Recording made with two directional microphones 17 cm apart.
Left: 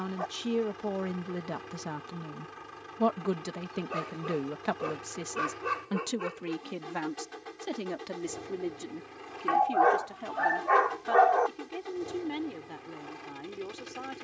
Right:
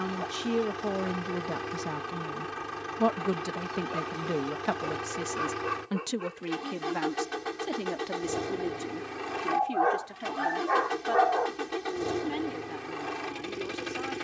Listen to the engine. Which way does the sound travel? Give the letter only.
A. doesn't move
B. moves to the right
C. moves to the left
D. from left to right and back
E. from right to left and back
A.